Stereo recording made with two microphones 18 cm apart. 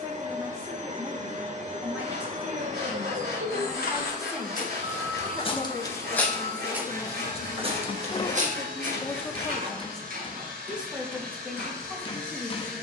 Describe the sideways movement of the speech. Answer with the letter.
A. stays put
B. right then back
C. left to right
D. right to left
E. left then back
E.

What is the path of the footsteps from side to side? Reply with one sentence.
You can hear the footsteps move from left to right.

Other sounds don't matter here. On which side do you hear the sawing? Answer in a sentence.
You can hear the sawing on the right.